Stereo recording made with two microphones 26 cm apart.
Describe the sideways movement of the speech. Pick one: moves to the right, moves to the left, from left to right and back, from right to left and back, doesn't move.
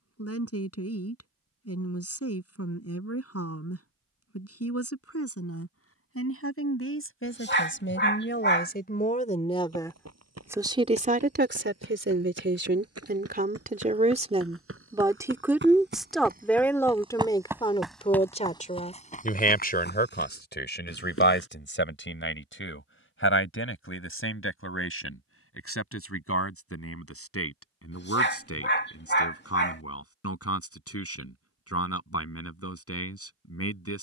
from left to right and back.